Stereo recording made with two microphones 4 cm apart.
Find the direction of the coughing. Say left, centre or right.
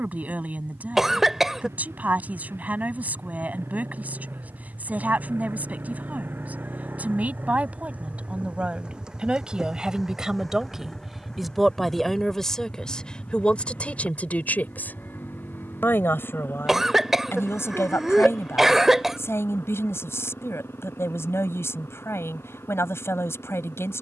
centre.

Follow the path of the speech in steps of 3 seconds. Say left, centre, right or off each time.
right, right, right, centre, left, left, left, left.